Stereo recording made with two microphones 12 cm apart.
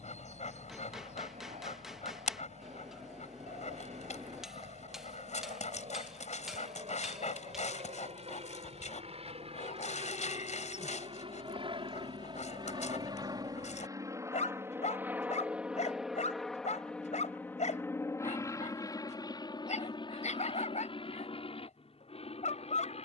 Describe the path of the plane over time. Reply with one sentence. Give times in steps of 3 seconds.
In this clip you hear the plane on the right from 0 s, in the centre from 15 s and on the left from 18 s.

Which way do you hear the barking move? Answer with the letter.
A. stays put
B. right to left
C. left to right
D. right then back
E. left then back
A.